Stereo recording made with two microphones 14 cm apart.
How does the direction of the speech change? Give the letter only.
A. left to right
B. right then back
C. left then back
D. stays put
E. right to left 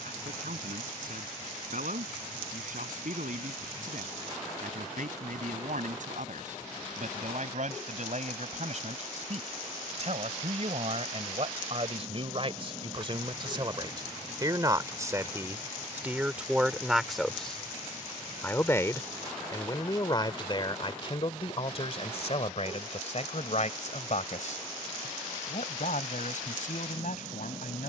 E.